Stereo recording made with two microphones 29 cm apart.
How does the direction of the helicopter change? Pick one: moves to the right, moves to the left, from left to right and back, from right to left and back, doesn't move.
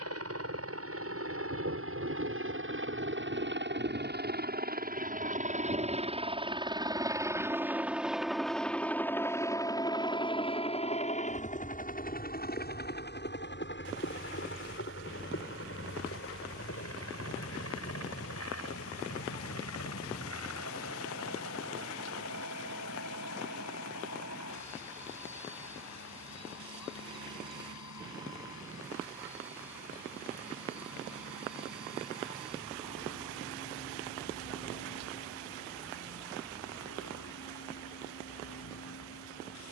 moves to the left.